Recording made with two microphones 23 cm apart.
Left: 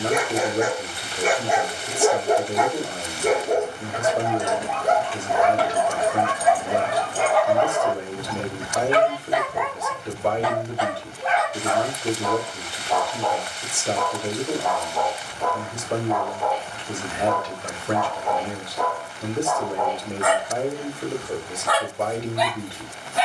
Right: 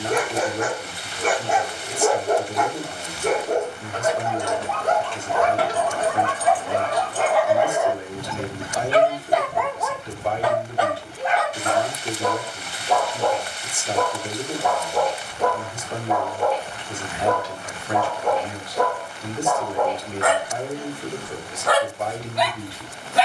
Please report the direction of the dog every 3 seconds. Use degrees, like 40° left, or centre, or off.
10° left, 10° left, 10° right, 60° right, 70° right, 70° right, 70° right, 70° right.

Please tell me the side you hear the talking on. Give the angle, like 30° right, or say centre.
60° left.